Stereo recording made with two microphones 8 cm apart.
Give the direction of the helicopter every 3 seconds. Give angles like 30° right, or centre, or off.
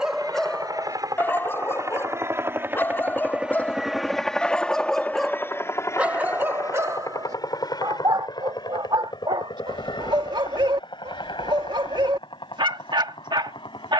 40° right, 10° left, 50° left, 60° left, 70° left.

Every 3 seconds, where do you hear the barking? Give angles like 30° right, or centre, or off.
20° left, 10° left, 50° right, 70° right, 70° right.